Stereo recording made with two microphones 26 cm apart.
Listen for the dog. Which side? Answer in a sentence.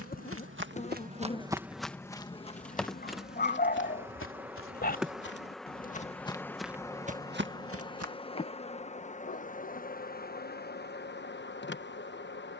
In this clip you hear the dog on the left.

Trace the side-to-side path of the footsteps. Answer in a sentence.
You can hear the footsteps go left and come back.